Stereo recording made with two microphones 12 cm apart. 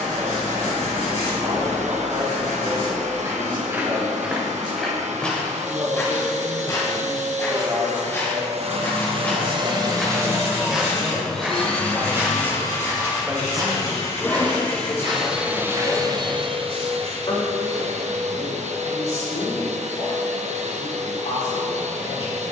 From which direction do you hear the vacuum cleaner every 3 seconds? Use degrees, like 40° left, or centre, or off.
70° right, 70° right, 70° right, 20° right, 20° left, 40° right, 70° right, 70° right.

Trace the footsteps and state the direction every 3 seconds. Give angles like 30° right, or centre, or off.
50° right, 10° right, 20° left, centre, 30° right, 50° right, off, off.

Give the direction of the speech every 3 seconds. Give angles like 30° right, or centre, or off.
40° right, 40° right, 40° right, 40° right, centre, 40° left, 60° left, 70° left.